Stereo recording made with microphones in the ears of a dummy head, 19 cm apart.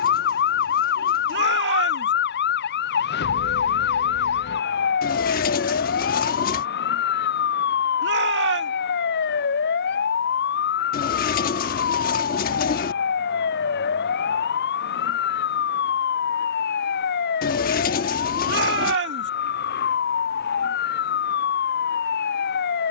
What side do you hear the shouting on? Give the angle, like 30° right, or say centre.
60° right.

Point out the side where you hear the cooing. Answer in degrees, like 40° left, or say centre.
40° left.